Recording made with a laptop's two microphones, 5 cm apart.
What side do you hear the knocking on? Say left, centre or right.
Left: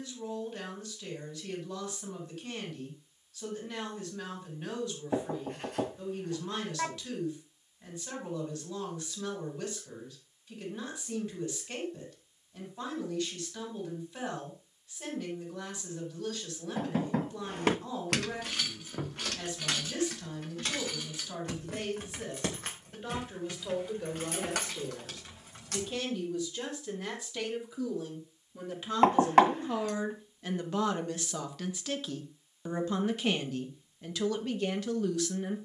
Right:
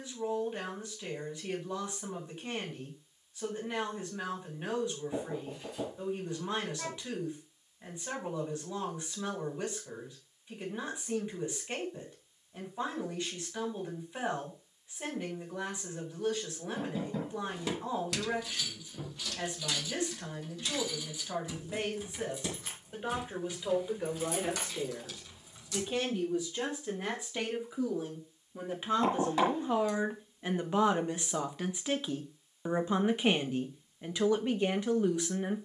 left.